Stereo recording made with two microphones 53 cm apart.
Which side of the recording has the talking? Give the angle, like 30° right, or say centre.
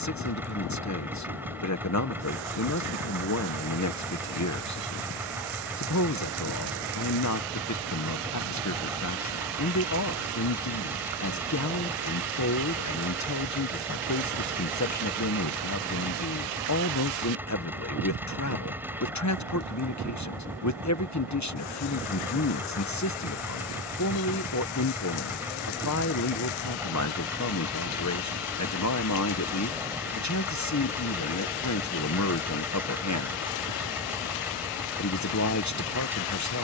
30° left.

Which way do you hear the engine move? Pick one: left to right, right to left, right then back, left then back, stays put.
stays put.